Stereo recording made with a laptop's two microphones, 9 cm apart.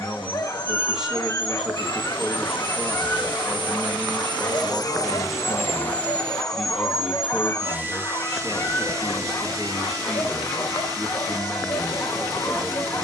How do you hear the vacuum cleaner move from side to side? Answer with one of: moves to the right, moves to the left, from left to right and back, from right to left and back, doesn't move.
moves to the right.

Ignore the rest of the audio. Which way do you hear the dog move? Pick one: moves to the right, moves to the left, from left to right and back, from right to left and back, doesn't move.
doesn't move.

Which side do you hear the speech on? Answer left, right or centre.
centre.